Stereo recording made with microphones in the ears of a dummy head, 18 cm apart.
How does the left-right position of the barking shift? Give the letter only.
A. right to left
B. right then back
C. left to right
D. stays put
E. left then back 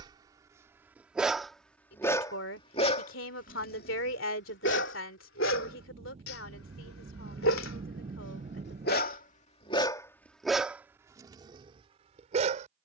E.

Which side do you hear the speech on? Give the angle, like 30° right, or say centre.
70° left.